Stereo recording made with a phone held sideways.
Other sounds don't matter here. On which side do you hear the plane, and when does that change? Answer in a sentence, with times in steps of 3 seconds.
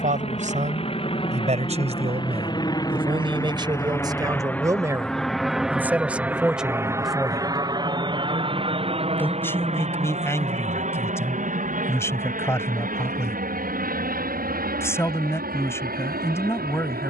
In this clip you hear the plane on the left from 0 s, in the centre from 3 s and on the right from 6 s.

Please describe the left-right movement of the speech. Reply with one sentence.
In this clip you hear the speech move from right to left.